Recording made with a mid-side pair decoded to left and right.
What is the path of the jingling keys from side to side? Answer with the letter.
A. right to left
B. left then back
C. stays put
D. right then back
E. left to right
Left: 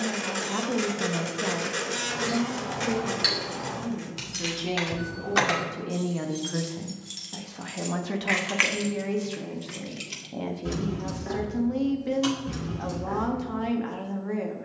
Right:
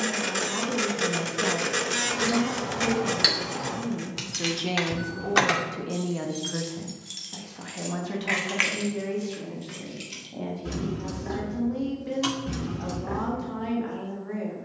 B.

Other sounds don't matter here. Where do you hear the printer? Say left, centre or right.
right.